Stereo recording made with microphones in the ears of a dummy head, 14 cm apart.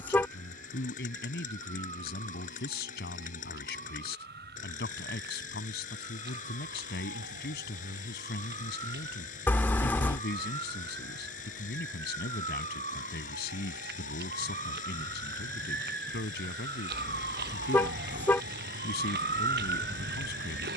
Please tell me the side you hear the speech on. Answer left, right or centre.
left.